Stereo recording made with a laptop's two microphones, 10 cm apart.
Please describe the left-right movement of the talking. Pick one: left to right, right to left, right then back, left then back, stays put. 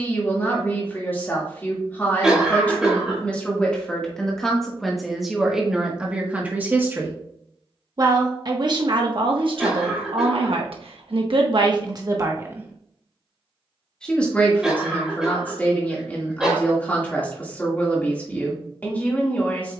right then back.